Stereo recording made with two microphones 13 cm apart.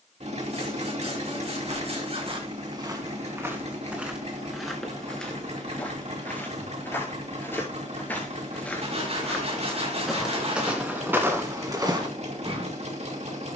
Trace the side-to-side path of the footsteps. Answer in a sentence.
You can hear the footsteps move from right to left and back again.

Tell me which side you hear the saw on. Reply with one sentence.
In this clip you hear the saw on the right.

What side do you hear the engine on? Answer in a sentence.
In this clip you hear the engine on the right.